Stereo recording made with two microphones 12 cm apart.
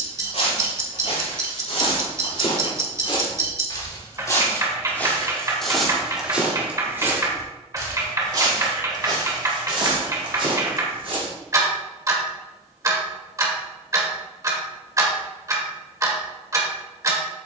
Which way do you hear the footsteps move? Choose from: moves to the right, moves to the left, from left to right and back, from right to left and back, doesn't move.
moves to the right.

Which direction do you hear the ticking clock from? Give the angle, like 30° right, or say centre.
30° right.